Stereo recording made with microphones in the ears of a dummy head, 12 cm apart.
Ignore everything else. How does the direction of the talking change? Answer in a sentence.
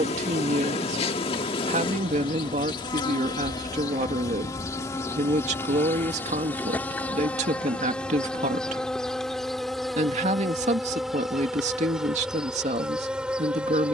You can hear the talking stay in one place.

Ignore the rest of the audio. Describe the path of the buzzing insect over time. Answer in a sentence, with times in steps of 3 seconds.
In this clip you hear the buzzing insect on the left from 0 s and in the centre from 6 s.